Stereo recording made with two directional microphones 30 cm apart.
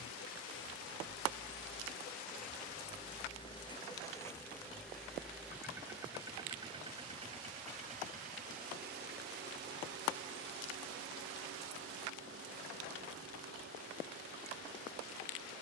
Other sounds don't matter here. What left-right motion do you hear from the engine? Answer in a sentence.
You can hear the engine move to the right.